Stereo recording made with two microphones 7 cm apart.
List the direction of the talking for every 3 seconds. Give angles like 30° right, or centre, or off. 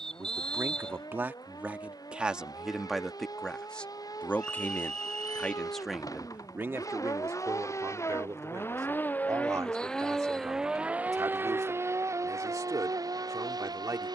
20° right, 10° left, 40° right, 50° right, 50° right.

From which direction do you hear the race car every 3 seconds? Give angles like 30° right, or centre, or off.
70° left, 70° left, 50° left, 10° right, 50° right.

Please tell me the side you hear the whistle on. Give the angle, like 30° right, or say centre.
10° left.